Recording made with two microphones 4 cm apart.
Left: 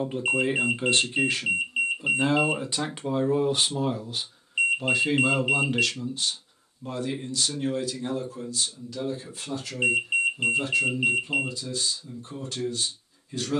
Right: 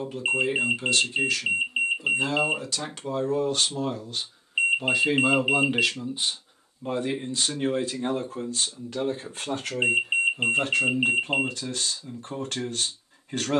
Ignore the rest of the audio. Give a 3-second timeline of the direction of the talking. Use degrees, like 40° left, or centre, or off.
30° left, centre, 30° right, 50° right, 60° right.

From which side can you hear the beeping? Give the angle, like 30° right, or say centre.
20° right.